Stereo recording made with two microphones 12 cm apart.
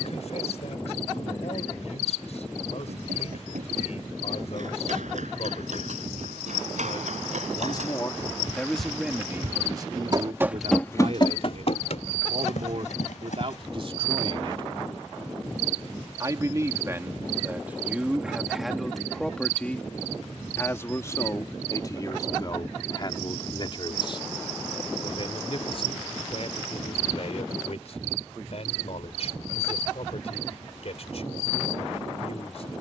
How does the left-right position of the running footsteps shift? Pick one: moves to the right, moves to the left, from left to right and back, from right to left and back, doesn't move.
moves to the left.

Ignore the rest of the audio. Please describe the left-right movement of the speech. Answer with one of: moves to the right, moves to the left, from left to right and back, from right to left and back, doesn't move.
from left to right and back.